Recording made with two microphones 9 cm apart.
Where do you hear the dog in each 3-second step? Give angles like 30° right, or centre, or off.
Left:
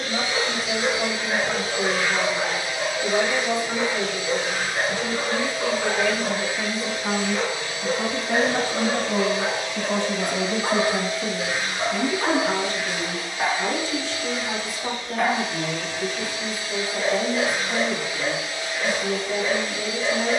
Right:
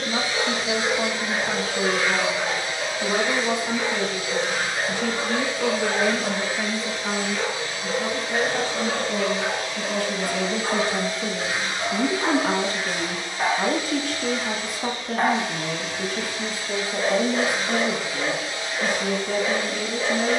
30° left, 30° left, 30° left, 30° left, centre, 40° right, 50° right.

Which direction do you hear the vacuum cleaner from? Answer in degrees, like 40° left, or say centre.
40° right.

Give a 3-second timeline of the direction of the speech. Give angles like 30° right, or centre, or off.
60° right, 60° right, 20° left, 20° left, 40° right, 60° right, 60° right.